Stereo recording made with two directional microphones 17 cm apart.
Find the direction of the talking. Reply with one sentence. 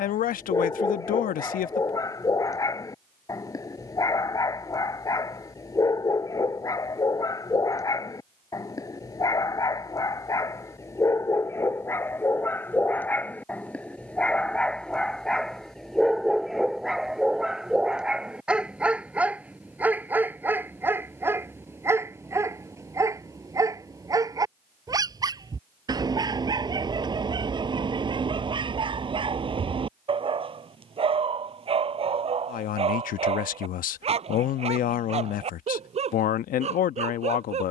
In this clip you hear the talking on the left.